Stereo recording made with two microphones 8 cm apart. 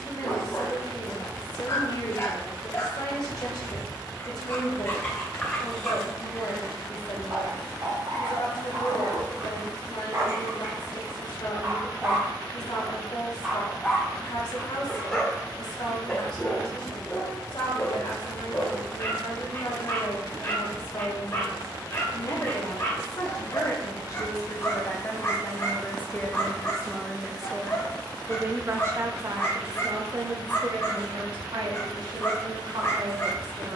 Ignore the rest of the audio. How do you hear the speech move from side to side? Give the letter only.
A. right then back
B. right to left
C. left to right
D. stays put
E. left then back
C.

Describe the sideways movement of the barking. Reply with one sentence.
In this clip you hear the barking move from left to right and back again.